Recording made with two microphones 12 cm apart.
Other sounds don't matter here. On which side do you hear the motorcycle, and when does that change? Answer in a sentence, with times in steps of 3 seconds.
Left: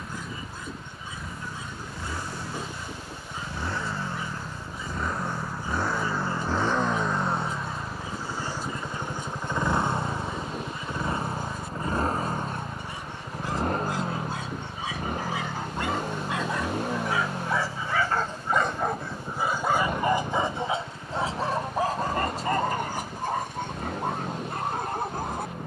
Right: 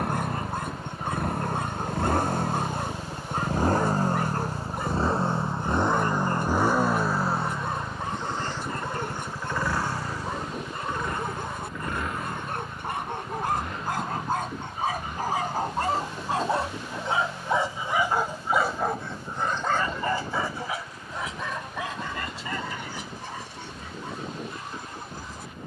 In this clip you hear the motorcycle on the right from 0 s, in the centre from 6 s and on the left from 9 s.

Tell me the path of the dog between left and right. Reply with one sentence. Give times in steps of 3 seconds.
You can hear the dog on the right from 0 s, in the centre from 18 s and on the left from 21 s.